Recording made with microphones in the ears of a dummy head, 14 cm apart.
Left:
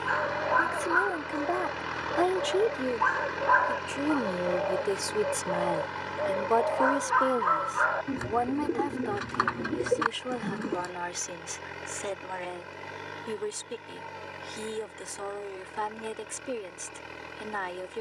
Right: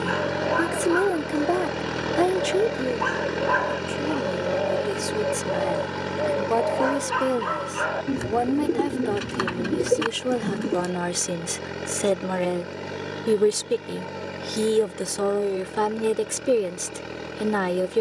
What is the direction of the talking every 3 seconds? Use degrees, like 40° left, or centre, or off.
30° right, centre, 20° right, 50° right, 60° right, 60° right.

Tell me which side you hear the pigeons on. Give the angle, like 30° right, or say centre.
30° right.